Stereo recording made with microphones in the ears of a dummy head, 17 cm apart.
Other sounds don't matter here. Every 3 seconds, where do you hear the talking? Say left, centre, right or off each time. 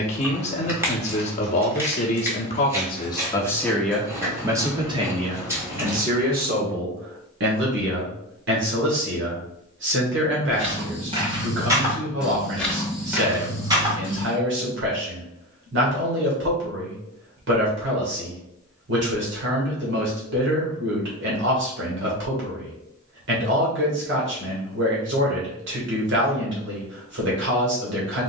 left, centre, right, right, right, right, right, right, right, right.